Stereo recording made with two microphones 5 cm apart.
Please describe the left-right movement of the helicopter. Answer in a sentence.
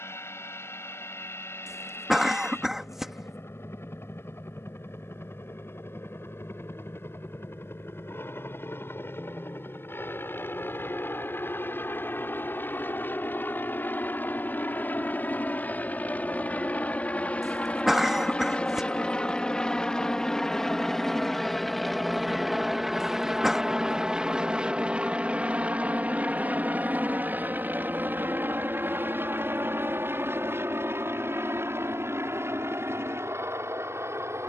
In this clip you hear the helicopter travel towards the right.